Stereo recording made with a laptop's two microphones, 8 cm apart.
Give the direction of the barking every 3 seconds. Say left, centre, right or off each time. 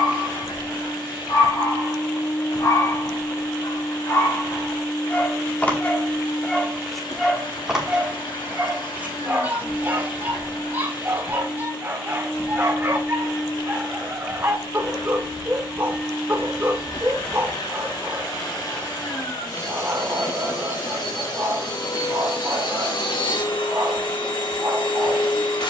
left, left, centre, right, right, right, right, right, right.